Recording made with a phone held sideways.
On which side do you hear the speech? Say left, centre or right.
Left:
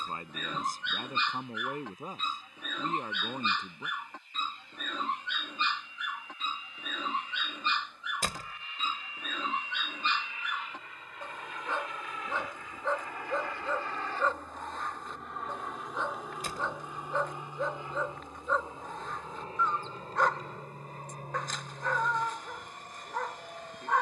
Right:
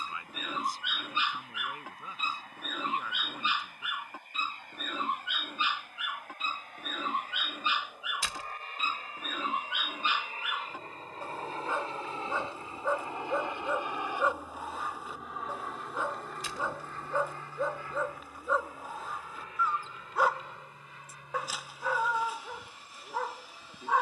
left.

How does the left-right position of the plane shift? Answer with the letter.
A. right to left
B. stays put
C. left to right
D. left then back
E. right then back
A.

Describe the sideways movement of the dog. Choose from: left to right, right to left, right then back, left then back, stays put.
stays put.